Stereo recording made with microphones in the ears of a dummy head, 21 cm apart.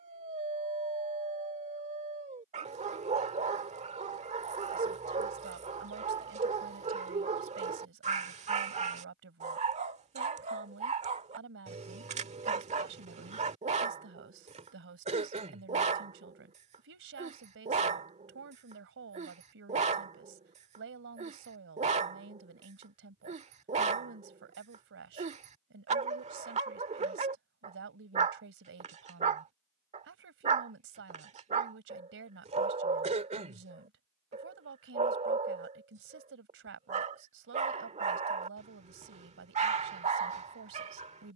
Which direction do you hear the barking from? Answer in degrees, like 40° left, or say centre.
30° right.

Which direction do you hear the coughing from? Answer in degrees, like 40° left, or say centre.
30° right.